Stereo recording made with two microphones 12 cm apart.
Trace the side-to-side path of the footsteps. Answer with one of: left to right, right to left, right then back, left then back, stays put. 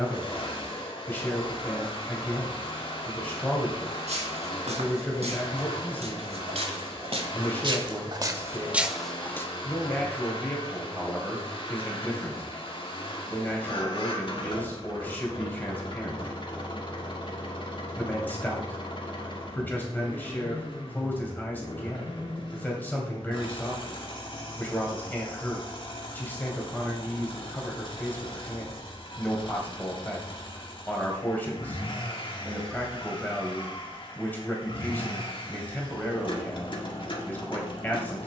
right to left.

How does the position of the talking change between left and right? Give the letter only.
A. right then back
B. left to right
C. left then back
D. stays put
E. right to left
D.